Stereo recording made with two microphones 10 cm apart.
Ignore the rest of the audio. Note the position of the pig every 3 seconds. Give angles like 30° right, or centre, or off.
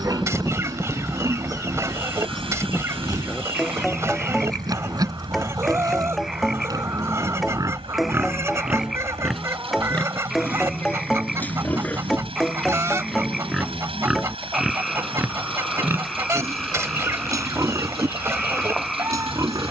40° right, 40° right, 30° right, 10° left, centre, 30° right, 40° right.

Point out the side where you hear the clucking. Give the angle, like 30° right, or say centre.
30° right.